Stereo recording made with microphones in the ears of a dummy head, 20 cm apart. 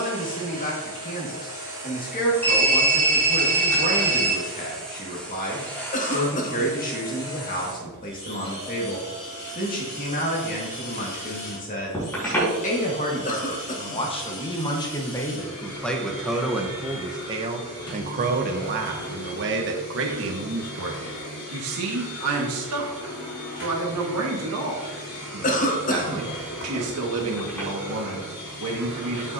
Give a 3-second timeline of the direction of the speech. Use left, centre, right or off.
left, left, left, left, left, centre, right, right, right, right.